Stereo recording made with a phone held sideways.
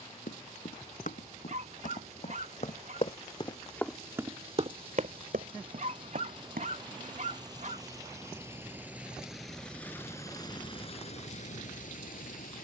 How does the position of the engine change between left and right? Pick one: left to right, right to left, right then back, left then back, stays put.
right to left.